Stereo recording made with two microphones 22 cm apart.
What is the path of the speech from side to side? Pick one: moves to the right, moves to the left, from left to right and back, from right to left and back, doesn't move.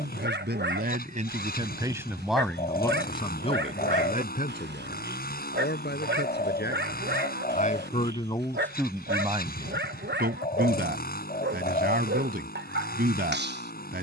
from right to left and back.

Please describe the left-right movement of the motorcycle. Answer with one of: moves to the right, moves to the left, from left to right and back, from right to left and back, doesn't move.
doesn't move.